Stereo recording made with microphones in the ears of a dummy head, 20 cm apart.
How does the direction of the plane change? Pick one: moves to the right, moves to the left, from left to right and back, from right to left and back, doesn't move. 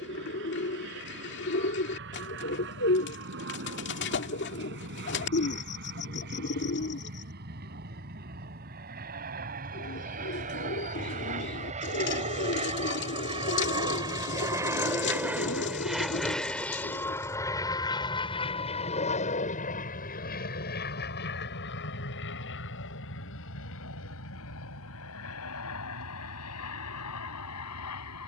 moves to the left.